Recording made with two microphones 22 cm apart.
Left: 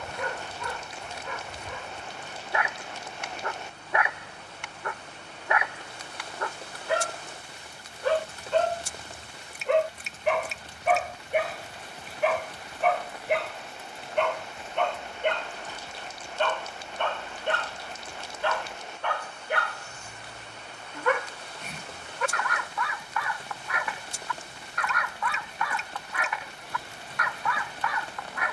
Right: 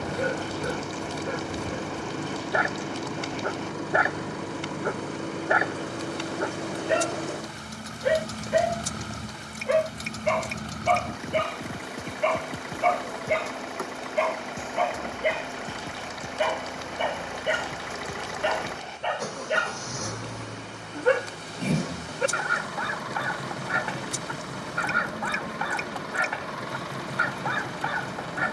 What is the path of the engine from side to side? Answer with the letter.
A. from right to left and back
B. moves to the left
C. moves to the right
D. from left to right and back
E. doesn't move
E.